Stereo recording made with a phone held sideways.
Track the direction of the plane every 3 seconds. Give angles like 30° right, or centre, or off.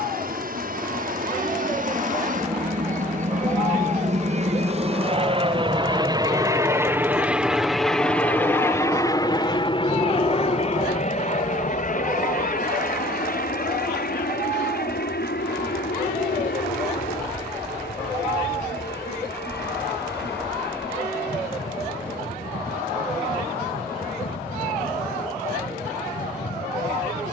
60° right, 40° right, centre, 40° left, 60° left, 70° left, 70° left, 70° left, 80° left.